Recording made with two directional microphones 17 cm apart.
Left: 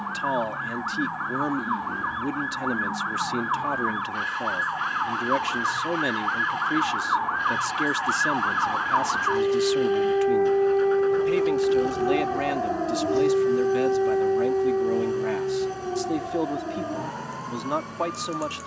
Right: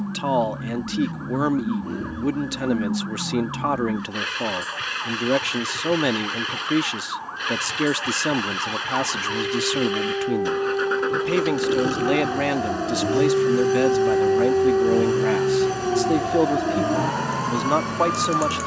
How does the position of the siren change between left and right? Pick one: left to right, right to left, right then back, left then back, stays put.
left to right.